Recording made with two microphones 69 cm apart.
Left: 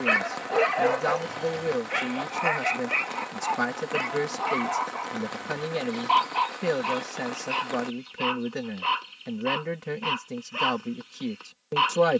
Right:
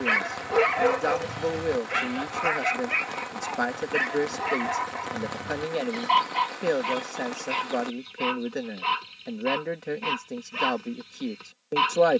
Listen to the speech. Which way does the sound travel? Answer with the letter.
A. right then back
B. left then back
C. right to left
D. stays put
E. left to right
D.